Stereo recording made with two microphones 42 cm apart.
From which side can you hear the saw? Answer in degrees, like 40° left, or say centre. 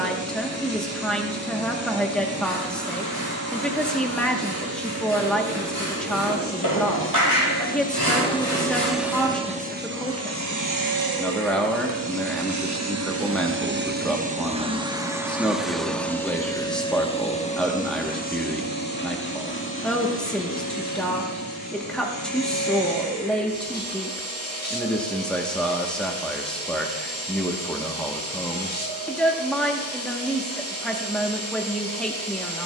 50° right.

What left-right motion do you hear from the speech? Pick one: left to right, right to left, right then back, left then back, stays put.
stays put.